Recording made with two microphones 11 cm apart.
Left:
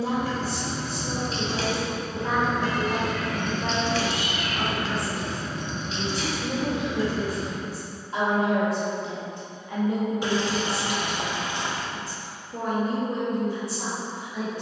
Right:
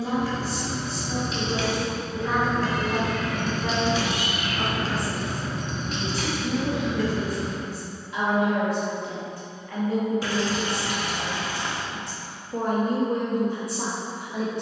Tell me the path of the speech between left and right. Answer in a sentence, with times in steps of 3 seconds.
You can hear the speech on the left from 0 s, in the centre from 9 s and on the right from 12 s.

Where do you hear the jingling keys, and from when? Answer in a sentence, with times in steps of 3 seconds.
In this clip you hear the jingling keys on the left from 0 s, on the right from 3 s and not at all from 9 s.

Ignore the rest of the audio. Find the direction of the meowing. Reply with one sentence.
You can hear the meowing in the centre.